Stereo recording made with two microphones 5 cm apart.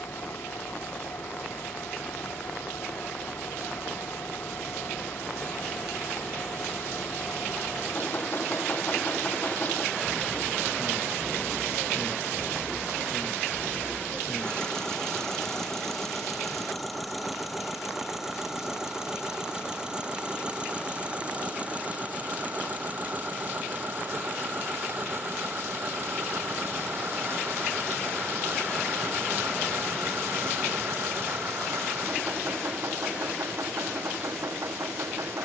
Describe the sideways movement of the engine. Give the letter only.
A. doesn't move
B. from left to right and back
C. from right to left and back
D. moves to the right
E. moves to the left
D.